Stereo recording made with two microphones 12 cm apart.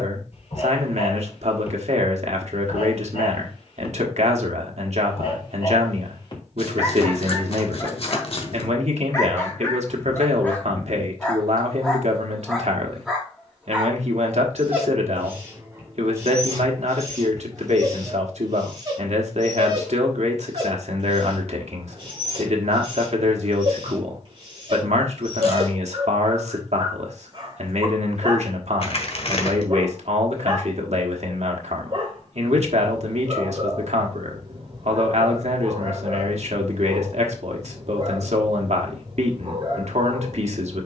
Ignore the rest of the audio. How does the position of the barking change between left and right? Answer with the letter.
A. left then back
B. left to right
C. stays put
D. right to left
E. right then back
B.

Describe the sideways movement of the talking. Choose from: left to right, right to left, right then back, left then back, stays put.
stays put.